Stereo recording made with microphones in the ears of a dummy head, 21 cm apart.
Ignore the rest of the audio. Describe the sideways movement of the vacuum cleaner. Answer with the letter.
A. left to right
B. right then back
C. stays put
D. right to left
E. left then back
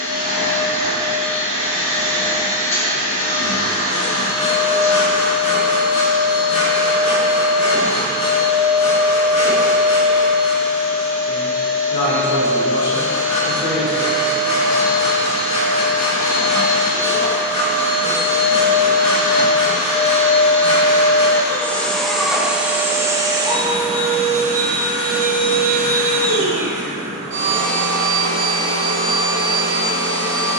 A.